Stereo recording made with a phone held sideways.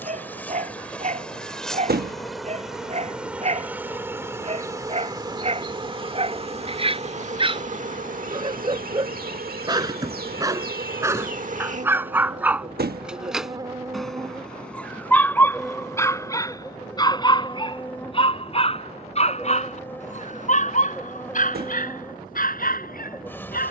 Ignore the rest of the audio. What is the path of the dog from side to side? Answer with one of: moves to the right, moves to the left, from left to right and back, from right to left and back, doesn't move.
moves to the left.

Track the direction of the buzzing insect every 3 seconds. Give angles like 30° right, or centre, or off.
centre, 20° right, 50° right, 60° right, 30° right, 10° left, 10° left, 10° left.